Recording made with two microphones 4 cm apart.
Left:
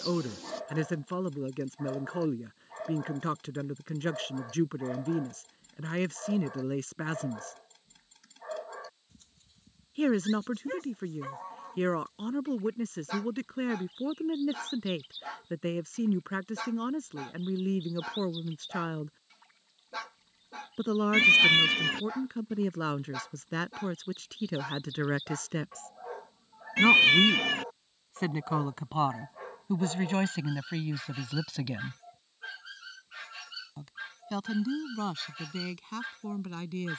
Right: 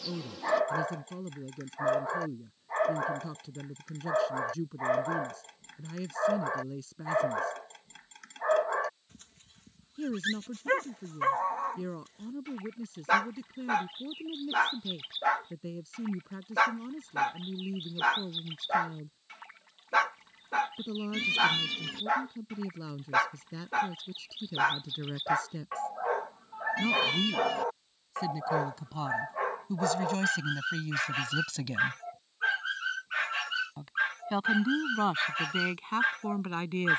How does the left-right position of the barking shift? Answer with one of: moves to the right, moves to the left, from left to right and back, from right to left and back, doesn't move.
doesn't move.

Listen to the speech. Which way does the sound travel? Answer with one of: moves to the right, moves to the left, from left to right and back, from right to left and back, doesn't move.
moves to the right.